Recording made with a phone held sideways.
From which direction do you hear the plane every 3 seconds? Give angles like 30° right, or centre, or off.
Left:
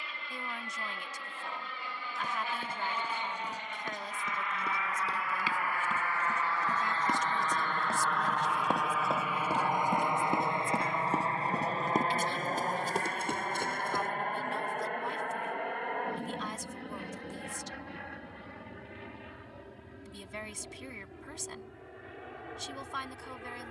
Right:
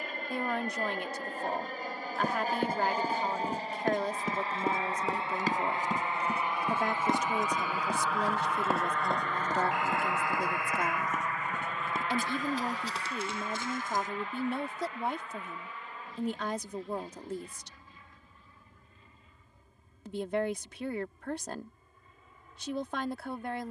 50° right, 30° right, 10° right, 20° left, 40° left, 60° left, 70° left, 70° left.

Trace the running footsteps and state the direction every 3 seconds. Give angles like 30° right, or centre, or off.
60° right, 50° right, 20° right, 20° left, 50° left, off, off, off.